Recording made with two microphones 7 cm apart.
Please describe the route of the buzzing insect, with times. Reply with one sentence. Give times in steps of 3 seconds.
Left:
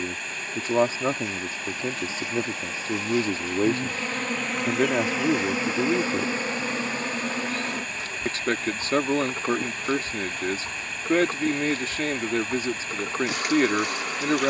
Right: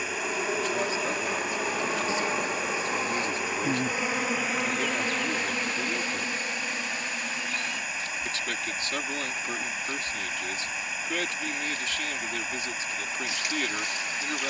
You can hear the buzzing insect on the right from 0 s, in the centre from 3 s and on the left from 6 s.